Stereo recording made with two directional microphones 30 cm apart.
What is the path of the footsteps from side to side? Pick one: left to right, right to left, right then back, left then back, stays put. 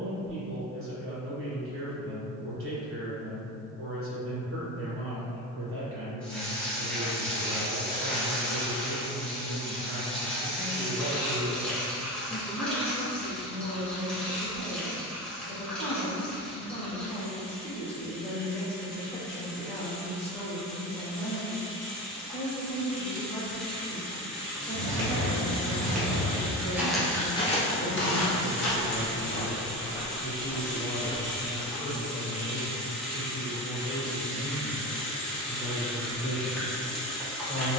left then back.